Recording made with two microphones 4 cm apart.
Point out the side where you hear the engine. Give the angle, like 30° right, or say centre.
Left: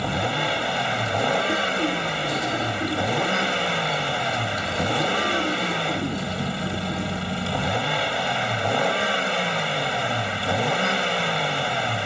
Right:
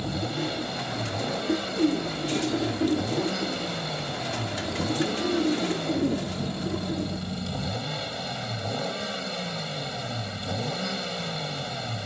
60° left.